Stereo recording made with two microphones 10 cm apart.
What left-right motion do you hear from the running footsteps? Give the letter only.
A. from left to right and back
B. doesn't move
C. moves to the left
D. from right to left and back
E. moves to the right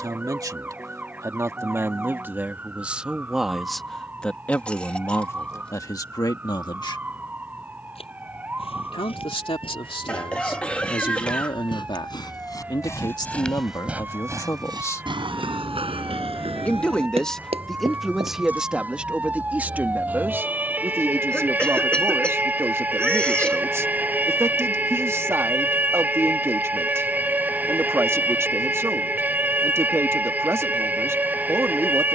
E.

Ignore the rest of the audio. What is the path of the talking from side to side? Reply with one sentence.
In this clip you hear the talking go left and come back.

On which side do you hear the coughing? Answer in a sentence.
You can hear the coughing in the centre.